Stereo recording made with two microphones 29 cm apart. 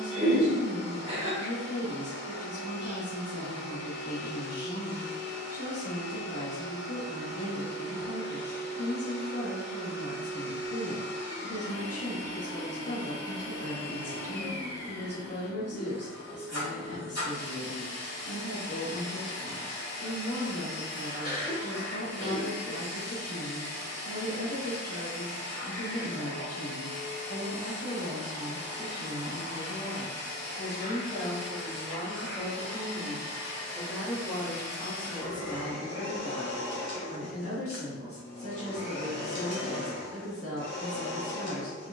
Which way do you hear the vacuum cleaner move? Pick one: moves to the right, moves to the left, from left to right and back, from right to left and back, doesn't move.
doesn't move.